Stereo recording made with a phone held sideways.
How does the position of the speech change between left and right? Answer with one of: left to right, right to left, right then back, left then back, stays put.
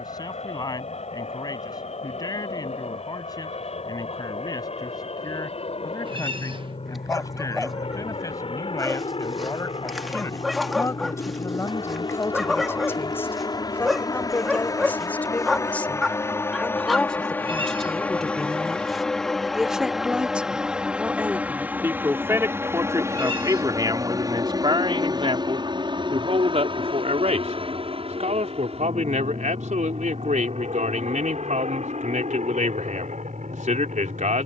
left to right.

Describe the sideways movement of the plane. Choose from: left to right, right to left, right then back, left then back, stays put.
left to right.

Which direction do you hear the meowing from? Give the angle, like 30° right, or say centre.
40° right.